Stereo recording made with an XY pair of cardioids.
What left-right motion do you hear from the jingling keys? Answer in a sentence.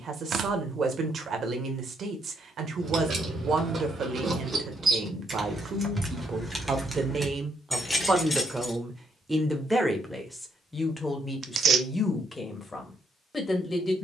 You can hear the jingling keys go from the right side to the left.